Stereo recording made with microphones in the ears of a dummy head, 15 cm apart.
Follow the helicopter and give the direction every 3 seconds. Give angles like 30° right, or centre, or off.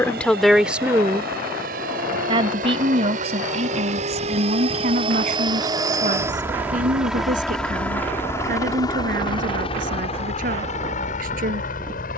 60° right, 40° right, centre, 40° left.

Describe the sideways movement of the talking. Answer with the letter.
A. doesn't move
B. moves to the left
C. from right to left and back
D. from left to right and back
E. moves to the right
E.